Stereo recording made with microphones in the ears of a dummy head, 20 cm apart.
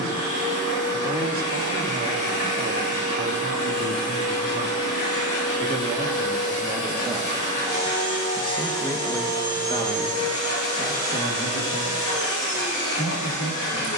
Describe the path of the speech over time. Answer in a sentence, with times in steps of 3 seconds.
In this clip you hear the speech on the right from 0 s, in the centre from 6 s and on the left from 9 s.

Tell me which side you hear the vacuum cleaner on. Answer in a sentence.
You can hear the vacuum cleaner on the left.